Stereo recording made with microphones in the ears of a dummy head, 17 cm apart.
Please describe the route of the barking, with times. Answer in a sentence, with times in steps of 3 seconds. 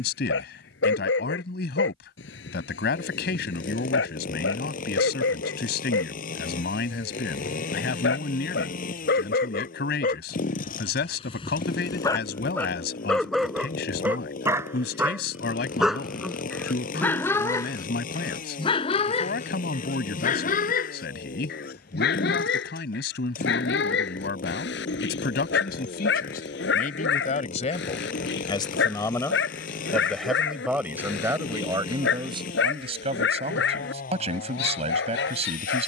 You can hear the barking on the left from 0 s, in the centre from 12 s and on the left from 18 s.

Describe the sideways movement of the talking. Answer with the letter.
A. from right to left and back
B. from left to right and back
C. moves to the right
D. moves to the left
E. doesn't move
C.